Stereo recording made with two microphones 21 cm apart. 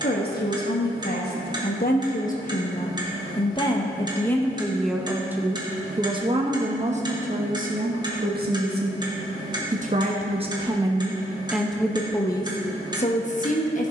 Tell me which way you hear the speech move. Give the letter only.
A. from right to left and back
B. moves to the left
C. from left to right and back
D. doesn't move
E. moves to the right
C.